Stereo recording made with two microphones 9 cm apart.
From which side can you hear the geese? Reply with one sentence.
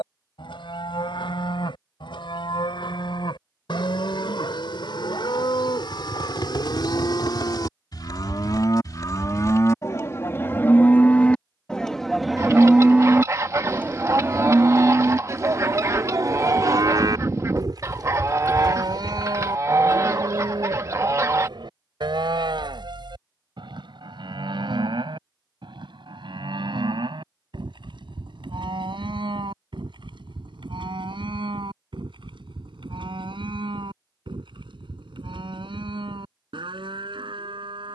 You can hear the geese on the right.